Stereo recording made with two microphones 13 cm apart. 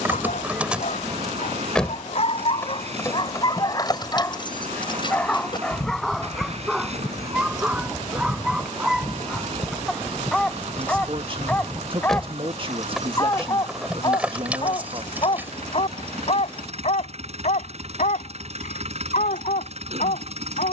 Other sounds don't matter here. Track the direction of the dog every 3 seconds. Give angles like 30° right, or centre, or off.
60° left, 20° left, 10° right, 10° left, 30° left, 50° left, 70° left.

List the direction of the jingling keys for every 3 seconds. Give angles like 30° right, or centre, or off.
centre, 30° left, 30° left, 10° left, 10° right, 10° right, off.